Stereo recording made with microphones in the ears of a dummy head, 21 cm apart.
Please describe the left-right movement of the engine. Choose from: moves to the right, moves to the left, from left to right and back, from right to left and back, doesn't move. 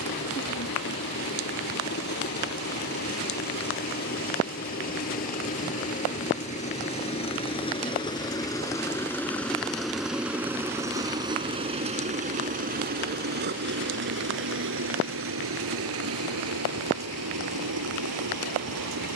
moves to the right.